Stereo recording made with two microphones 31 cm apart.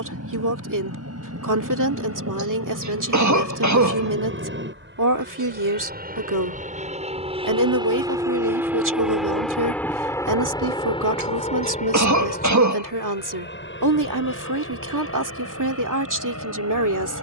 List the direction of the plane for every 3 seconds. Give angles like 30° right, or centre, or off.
60° right, 40° right, 20° right, 10° left, 30° left, 50° left.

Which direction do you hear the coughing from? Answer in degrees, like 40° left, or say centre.
70° right.